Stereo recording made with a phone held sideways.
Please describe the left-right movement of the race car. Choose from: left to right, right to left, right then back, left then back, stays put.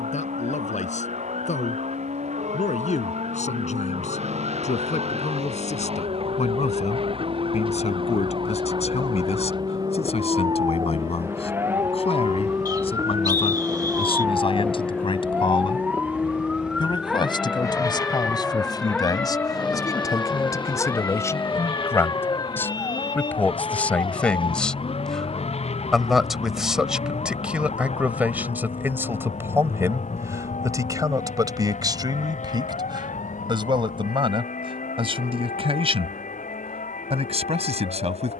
right to left.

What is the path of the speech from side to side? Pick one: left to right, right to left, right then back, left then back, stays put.
left to right.